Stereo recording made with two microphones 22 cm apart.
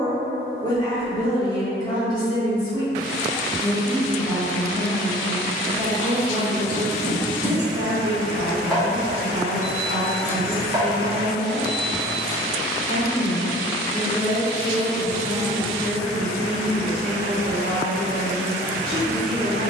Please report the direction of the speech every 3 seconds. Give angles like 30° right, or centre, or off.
20° left, centre, 30° right, 50° right, 50° right, 50° right, 50° right.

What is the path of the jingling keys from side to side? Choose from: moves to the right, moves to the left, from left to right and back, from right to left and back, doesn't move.
from left to right and back.